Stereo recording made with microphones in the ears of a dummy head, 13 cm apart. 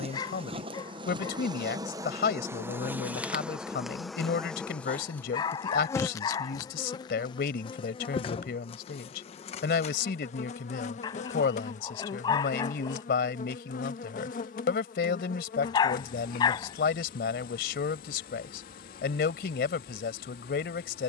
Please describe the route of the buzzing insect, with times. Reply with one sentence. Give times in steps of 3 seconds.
In this clip you hear the buzzing insect on the right from 0 s, in the centre from 3 s and on the left from 6 s.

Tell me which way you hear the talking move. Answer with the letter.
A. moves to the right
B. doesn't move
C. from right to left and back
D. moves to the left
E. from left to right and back
B.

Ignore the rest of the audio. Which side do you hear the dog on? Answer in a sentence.
You can hear the dog on the left.